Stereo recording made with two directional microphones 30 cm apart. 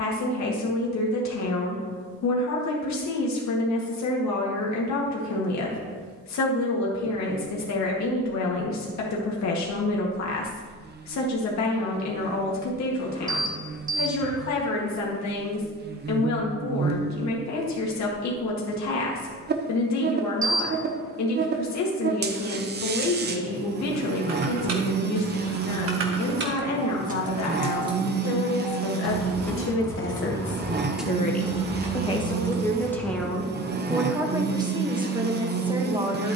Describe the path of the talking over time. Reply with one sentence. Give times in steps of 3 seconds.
You can hear the talking on the left from 0 s and in the centre from 33 s.